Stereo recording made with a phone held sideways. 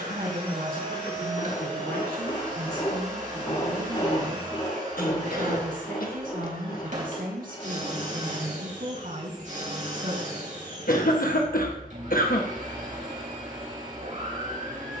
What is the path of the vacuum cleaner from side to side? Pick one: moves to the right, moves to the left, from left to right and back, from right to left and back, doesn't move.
doesn't move.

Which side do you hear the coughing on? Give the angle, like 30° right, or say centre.
80° left.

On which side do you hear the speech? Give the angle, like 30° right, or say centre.
70° right.